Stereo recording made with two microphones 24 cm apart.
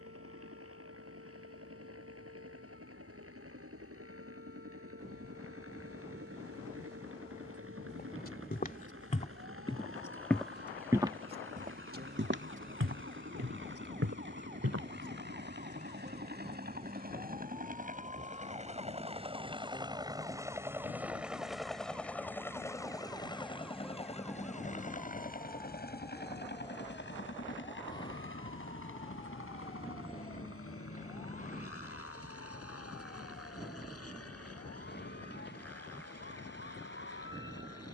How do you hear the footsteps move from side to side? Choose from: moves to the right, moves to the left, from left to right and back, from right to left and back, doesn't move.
moves to the right.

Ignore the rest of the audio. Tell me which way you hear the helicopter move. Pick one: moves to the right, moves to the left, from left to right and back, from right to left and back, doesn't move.
moves to the left.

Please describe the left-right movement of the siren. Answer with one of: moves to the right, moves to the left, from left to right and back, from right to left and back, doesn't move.
moves to the left.